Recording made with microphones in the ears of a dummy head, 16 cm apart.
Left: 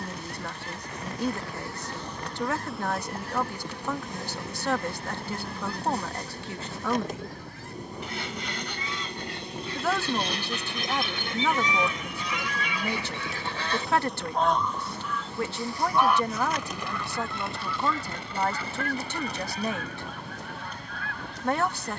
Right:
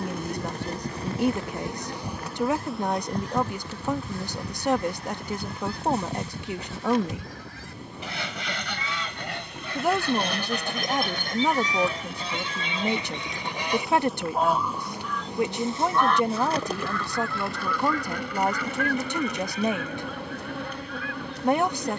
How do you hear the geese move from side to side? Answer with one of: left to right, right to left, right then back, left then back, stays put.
right to left.